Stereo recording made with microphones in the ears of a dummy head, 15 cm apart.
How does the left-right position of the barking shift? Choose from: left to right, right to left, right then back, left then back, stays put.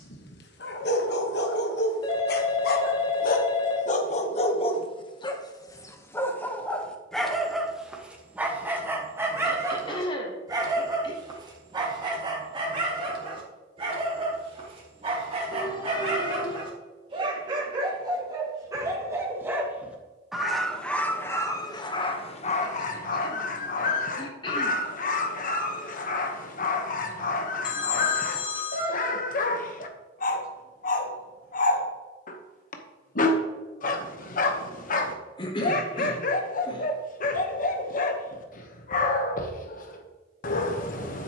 right then back.